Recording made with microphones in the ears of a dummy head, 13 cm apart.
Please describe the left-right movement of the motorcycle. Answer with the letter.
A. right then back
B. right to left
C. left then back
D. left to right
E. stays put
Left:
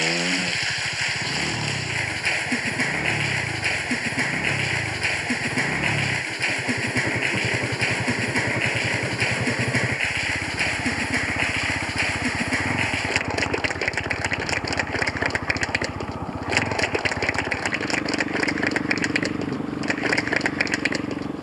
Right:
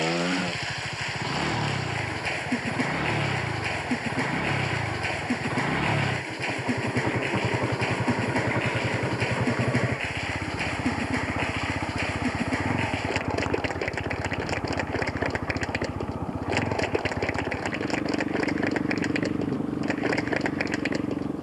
B.